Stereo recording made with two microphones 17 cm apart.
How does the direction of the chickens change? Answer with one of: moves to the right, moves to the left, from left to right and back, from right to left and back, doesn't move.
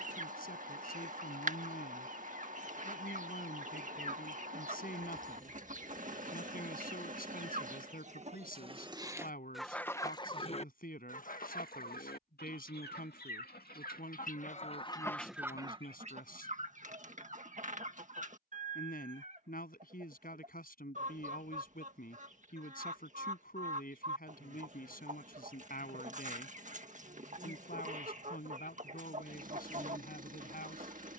from right to left and back.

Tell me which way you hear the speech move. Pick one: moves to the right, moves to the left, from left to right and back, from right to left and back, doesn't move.
doesn't move.